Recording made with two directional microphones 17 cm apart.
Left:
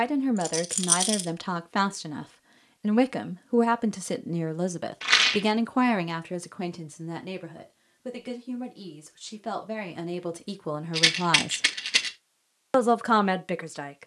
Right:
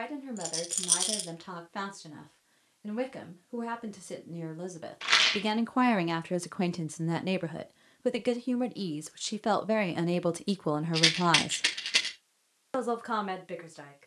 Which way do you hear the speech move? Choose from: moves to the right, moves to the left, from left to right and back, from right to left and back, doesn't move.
from left to right and back.